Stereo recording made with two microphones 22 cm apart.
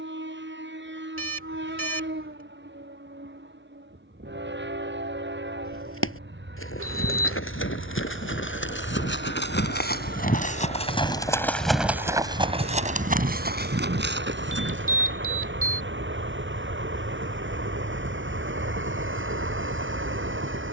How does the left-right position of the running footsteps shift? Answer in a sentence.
In this clip you hear the running footsteps travel towards the right.